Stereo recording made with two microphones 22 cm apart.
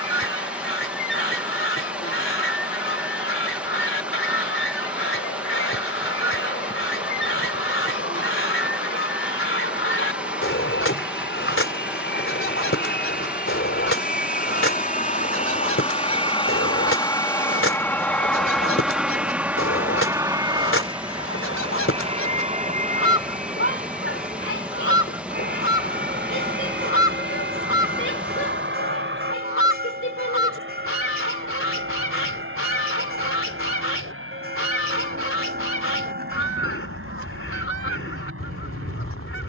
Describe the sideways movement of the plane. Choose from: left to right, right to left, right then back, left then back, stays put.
left to right.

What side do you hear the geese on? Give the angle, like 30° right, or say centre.
70° left.